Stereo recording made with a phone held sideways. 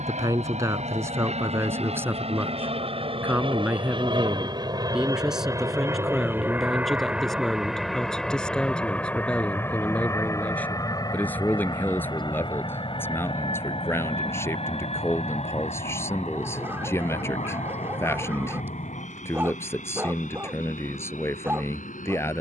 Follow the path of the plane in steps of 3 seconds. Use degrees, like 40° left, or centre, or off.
50° right, 30° right, centre, 20° left, 40° left, 50° left, 50° left, 60° left.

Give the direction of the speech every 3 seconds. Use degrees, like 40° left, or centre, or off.
20° right, 10° right, centre, 10° left, 20° left, 20° left, 20° left, 20° left.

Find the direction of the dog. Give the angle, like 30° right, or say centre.
20° right.